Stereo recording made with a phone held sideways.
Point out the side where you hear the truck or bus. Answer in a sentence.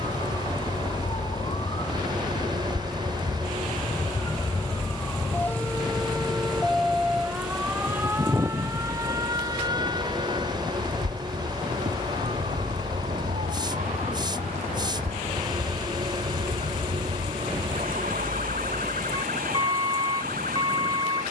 You can hear the truck or bus on the right.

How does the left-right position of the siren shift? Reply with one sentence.
In this clip you hear the siren go from the left side to the right.